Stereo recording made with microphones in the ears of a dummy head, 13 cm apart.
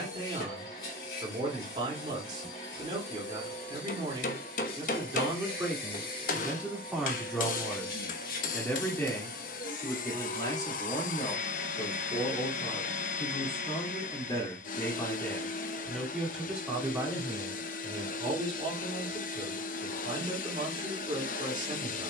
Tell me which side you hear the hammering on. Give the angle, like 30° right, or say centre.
60° left.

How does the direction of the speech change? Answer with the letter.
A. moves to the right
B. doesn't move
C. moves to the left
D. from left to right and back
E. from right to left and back
E.